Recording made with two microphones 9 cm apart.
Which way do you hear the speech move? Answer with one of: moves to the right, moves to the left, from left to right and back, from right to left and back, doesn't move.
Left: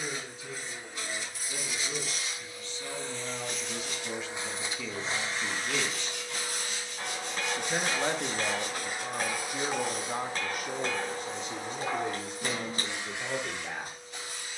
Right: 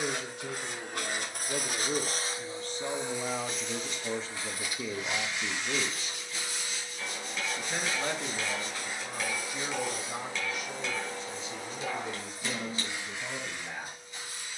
moves to the left.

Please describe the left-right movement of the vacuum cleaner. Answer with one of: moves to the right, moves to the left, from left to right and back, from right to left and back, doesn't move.
moves to the left.